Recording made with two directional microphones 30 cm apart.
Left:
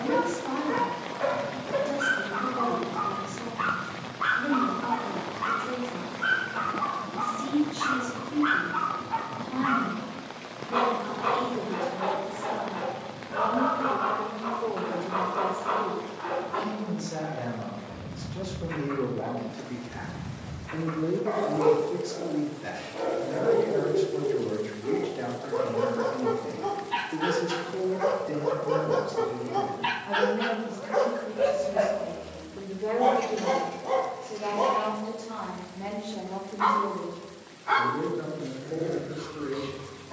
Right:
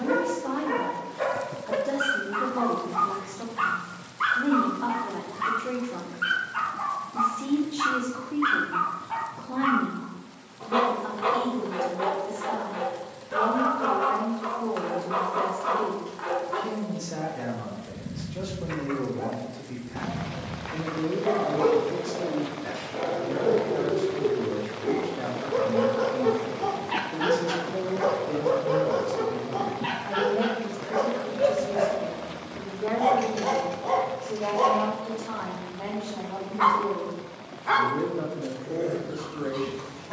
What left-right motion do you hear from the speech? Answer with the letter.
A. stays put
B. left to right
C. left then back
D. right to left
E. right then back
C.